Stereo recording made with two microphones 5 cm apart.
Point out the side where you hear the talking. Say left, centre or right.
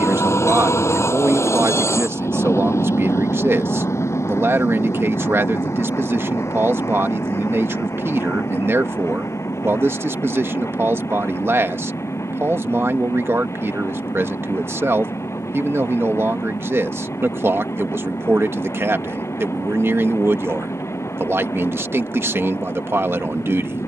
right.